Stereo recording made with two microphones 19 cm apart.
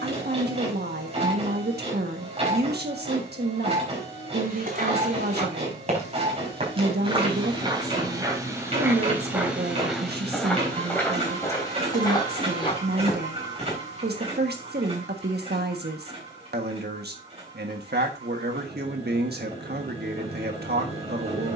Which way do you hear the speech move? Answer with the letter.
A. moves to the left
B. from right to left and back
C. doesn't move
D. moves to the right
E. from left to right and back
C.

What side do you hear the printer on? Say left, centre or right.
right.